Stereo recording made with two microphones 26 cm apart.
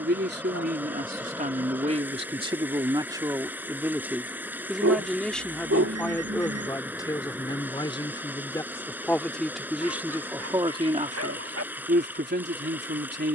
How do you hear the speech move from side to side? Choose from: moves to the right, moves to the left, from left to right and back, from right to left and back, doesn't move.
from right to left and back.